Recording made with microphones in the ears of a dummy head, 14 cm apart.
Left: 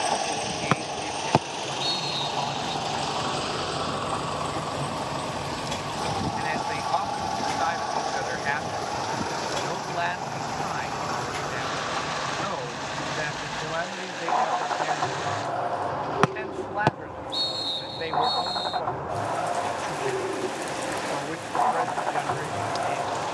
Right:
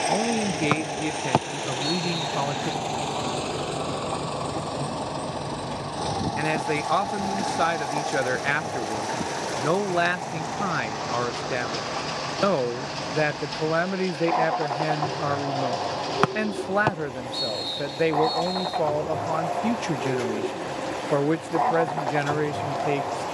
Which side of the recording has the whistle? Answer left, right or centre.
centre.